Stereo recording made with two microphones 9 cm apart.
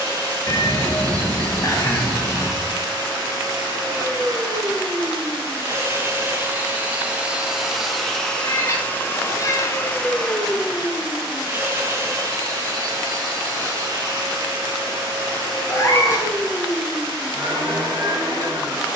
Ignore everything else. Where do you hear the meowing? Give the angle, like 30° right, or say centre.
30° left.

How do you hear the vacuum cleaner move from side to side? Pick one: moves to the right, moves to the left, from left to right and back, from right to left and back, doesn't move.
from right to left and back.